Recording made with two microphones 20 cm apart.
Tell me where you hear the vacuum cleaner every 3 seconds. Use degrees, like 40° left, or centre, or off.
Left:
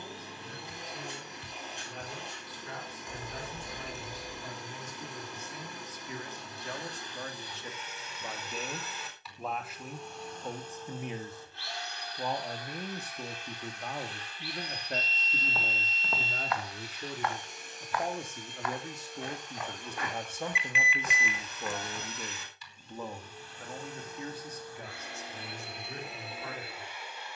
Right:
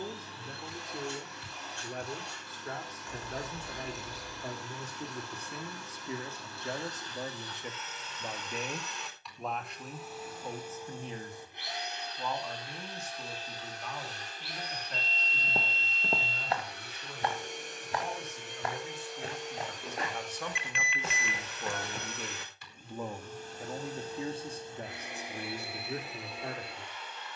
20° left, 20° left, 10° left, 10° right, 40° right, 60° right, 80° right, 60° right, 10° right.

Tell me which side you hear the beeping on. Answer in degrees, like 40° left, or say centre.
centre.